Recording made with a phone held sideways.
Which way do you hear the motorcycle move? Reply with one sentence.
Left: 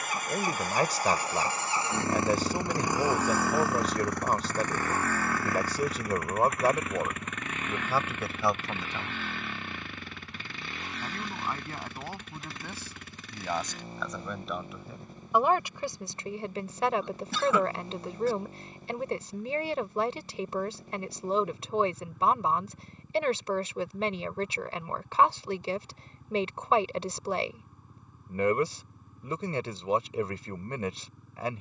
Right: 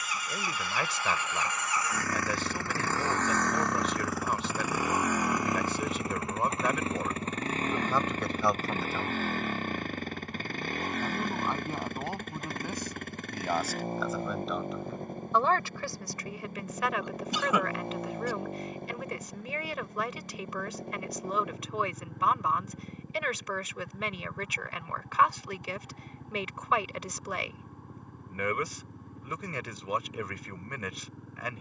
You can hear the motorcycle move to the right.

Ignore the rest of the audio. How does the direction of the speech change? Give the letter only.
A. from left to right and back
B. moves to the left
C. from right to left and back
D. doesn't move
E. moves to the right
A.